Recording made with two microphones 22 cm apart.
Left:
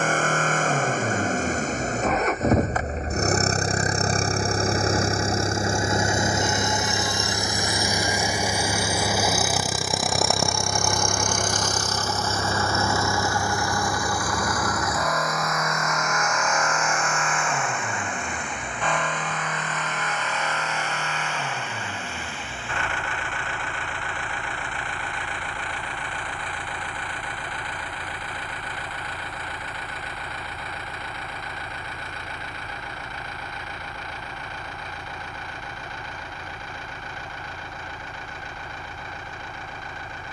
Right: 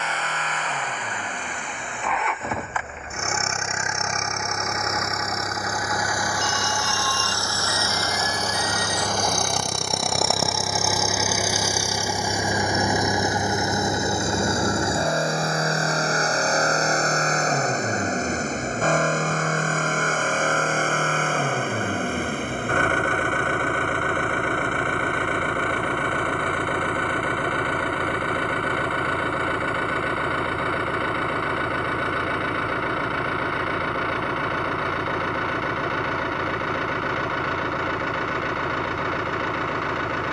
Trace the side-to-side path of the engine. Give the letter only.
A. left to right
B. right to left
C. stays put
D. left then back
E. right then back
A.